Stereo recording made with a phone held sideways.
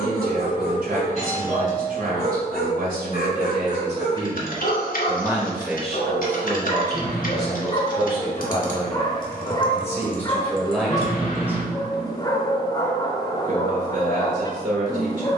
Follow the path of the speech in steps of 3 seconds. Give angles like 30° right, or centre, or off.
60° right, 30° right, 20° left, 10° left, 50° right.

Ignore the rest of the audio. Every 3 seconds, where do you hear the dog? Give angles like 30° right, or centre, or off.
60° left, 60° left, 40° left, 20° left, 20° left.